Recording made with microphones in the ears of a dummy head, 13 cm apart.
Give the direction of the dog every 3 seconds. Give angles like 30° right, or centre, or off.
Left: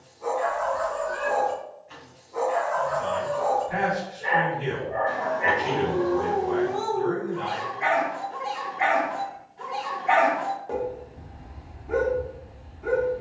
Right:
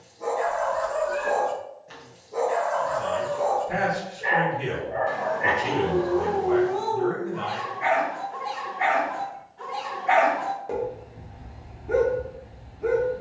50° right, centre, 30° left, 10° right, 50° right.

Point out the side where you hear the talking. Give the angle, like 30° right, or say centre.
80° right.